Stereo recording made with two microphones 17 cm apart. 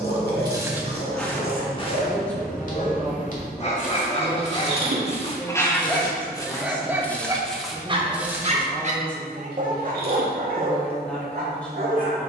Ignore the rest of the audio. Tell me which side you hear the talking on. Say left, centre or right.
centre.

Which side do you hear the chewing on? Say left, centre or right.
right.